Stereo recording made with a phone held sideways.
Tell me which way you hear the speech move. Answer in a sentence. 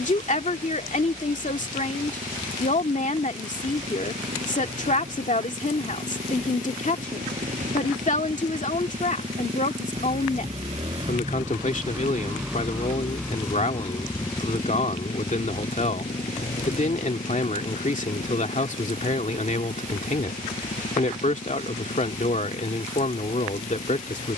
In this clip you hear the speech stay put.